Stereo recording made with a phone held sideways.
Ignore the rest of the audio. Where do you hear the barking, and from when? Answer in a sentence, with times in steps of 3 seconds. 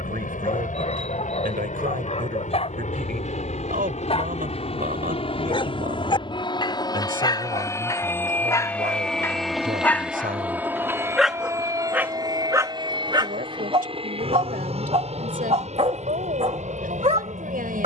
You can hear the barking on the left from 0 s, in the centre from 9 s and on the right from 12 s.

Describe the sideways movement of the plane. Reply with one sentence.
You can hear the plane travel towards the right.